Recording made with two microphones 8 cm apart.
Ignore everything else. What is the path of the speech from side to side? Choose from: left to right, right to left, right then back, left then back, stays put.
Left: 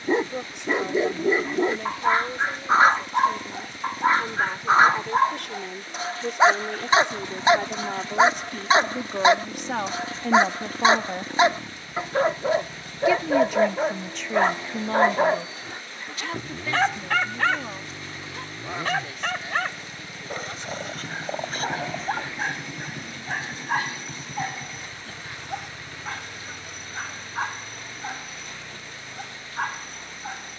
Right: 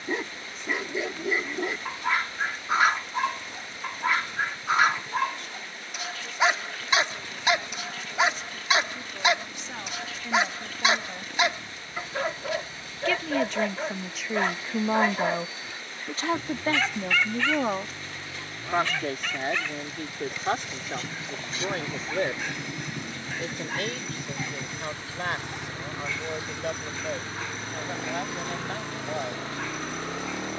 left to right.